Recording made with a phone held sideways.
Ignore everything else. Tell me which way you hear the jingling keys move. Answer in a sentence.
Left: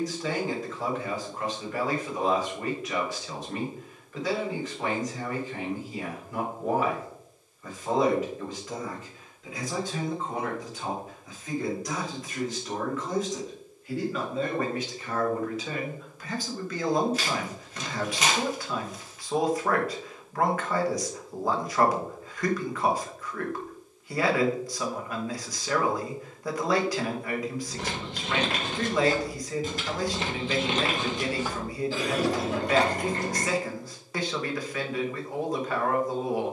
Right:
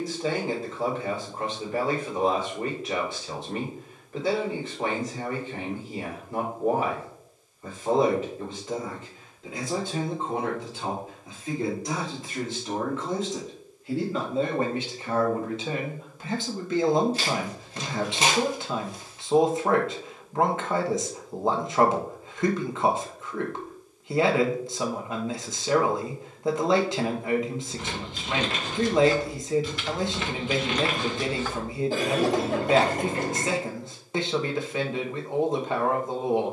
You can hear the jingling keys go from the left side to the right.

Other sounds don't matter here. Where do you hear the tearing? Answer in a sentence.
You can hear the tearing on the right.